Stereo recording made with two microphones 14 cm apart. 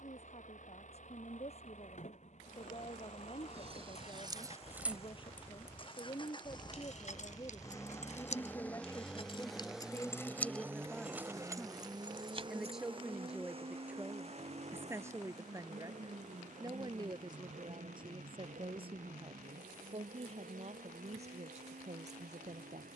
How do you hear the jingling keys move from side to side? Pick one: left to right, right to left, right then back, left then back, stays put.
left then back.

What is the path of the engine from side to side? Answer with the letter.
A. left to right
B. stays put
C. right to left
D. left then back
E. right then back
A.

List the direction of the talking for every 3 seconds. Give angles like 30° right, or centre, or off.
50° left, 40° left, 30° left, 10° left, 10° right, 30° right, 40° right, 50° right.